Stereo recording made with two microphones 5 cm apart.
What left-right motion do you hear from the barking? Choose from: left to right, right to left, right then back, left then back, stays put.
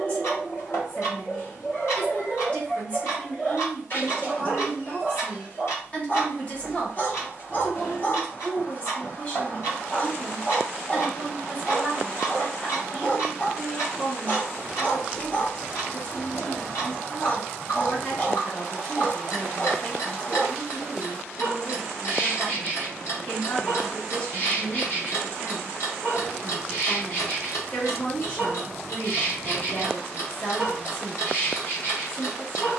stays put.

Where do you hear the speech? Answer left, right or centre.
left.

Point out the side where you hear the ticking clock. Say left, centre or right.
left.